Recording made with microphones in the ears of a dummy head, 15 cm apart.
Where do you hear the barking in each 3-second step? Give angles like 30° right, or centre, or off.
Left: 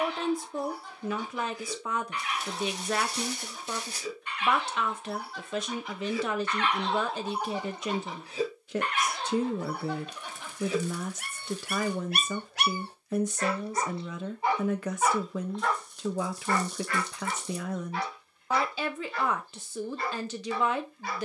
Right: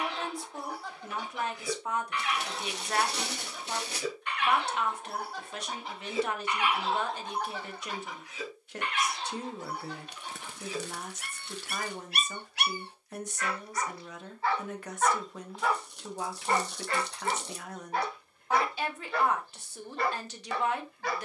60° right, 50° right, 10° left, 50° left, 30° left, 20° right, 50° right.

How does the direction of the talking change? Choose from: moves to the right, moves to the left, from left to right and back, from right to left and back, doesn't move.
doesn't move.